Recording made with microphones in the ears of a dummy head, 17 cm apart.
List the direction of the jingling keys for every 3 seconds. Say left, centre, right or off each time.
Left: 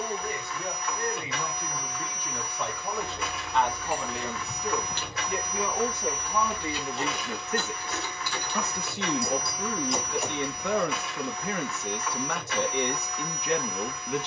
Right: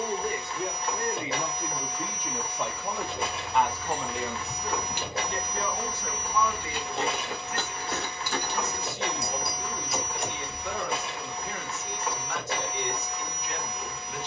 off, centre, right, centre, off.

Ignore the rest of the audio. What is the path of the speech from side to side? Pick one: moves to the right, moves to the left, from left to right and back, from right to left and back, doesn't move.
moves to the left.